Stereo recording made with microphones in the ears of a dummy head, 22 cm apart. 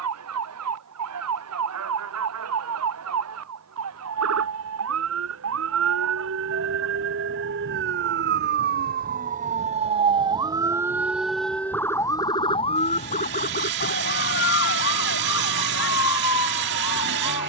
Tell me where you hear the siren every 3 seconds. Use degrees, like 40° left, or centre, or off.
70° right, 70° right, 50° right, 20° right, 30° left, 60° left.